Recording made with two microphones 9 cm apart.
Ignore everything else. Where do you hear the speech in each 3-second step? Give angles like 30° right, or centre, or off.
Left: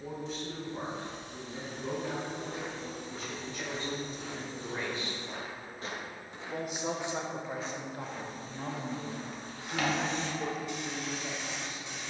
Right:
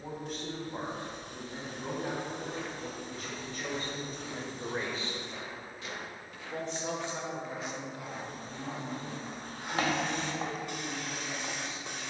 60° right, 40° right, 30° left, 60° left.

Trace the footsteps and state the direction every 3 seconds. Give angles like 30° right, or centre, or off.
20° left, 50° left, centre, 30° right.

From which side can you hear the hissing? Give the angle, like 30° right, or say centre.
50° right.